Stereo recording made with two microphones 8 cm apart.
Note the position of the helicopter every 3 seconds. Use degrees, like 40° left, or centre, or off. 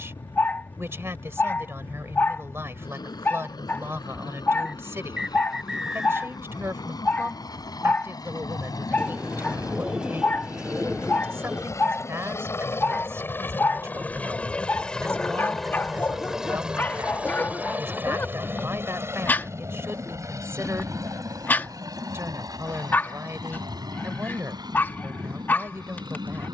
80° left, 70° left, 60° left, 50° left, 30° left, 10° right, 40° right, 50° right, 60° right.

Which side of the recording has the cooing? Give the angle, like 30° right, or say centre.
10° right.